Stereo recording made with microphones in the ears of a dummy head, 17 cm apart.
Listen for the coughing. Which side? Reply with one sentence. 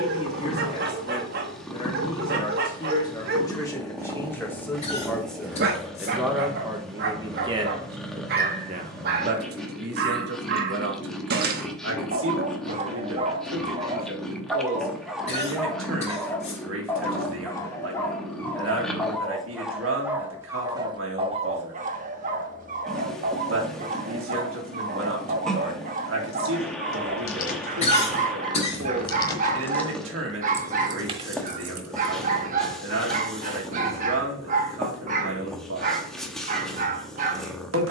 In this clip you hear the coughing on the left.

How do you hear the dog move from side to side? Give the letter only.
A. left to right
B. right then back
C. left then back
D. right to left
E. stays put
C.